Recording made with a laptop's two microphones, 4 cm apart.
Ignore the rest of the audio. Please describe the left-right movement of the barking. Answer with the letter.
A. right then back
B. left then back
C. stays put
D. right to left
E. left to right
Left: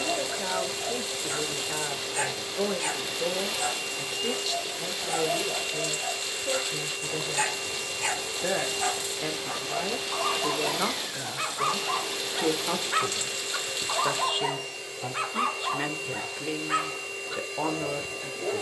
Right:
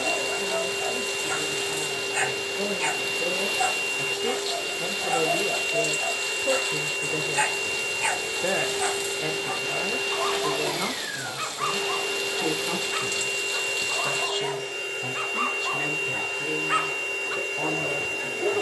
B.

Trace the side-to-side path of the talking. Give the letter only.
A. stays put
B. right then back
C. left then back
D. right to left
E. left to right
B.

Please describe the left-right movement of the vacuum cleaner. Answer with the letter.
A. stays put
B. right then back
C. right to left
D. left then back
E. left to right
A.